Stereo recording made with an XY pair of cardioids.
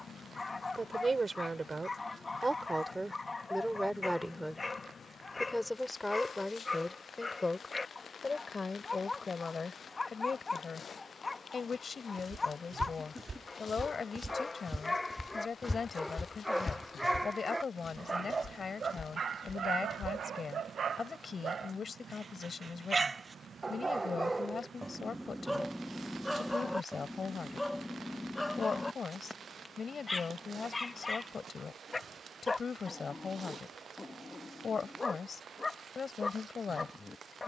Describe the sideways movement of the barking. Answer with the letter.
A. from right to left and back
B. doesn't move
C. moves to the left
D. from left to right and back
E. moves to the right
D.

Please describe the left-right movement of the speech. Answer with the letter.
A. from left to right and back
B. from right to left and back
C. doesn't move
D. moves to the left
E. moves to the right
D.